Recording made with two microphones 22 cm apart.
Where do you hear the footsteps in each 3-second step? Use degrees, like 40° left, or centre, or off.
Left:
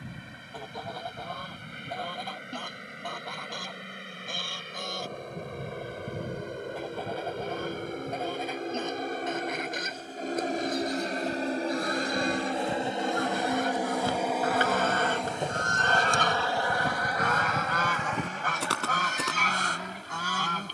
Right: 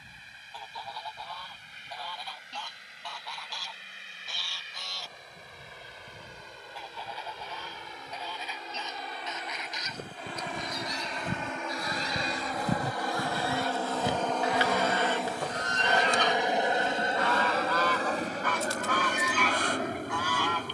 off, off, off, 60° right, 30° right, 50° left, 80° left.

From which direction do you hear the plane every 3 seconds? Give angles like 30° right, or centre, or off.
70° left, 70° left, 60° left, 40° left, 20° left, 20° right, 40° right.